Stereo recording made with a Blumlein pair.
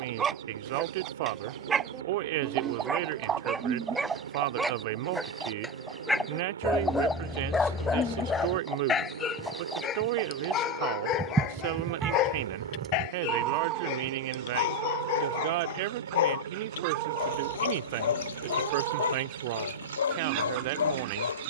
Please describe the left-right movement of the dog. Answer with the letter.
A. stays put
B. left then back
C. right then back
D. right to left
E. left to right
D.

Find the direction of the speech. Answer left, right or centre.
right.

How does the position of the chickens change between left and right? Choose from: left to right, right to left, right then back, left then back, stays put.
left then back.